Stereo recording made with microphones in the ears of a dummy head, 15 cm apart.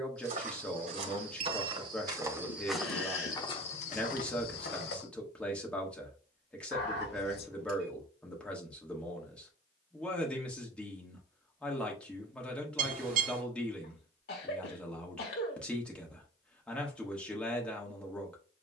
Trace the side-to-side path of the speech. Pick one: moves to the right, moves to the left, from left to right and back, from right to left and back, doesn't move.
doesn't move.